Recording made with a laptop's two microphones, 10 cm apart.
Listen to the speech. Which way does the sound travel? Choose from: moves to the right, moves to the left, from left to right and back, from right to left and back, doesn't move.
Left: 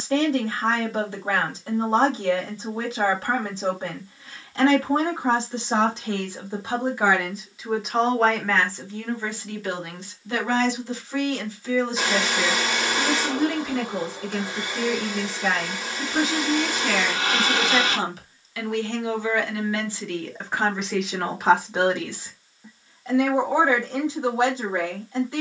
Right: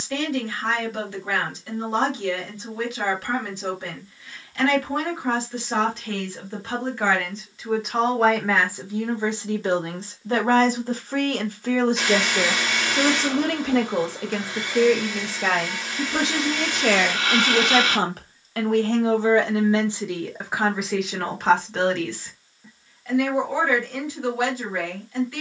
from left to right and back.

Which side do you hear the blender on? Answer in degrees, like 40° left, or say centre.
10° left.